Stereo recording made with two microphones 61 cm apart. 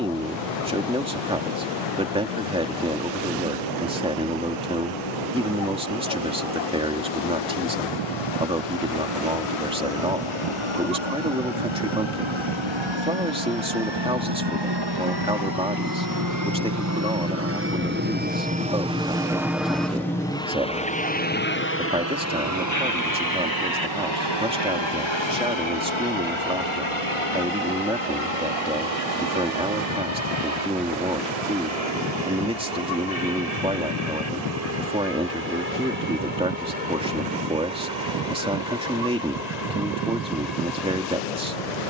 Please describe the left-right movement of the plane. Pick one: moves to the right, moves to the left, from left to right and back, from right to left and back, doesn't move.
moves to the left.